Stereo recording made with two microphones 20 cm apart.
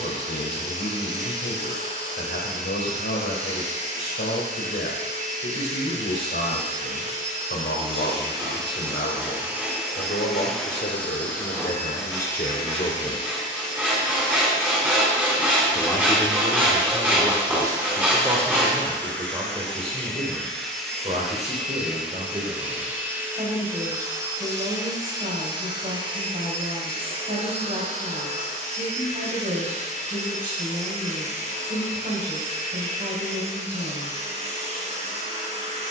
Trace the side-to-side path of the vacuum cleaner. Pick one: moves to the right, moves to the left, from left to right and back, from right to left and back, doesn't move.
from right to left and back.